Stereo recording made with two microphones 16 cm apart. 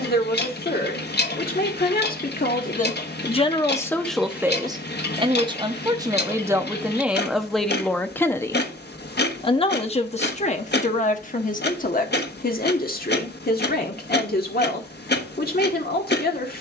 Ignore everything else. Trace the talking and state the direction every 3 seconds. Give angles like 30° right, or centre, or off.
60° left, centre, centre, 50° left, 60° left, 70° left.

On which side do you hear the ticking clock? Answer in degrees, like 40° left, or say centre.
80° left.